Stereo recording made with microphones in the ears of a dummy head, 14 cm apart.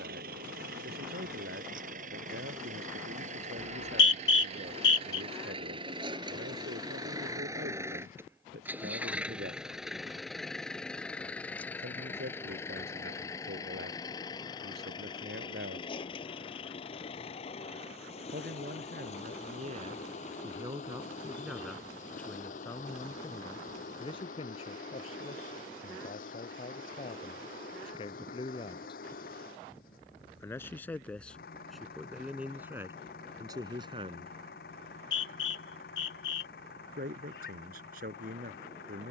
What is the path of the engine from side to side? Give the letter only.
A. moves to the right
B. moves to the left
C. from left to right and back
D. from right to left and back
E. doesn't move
B.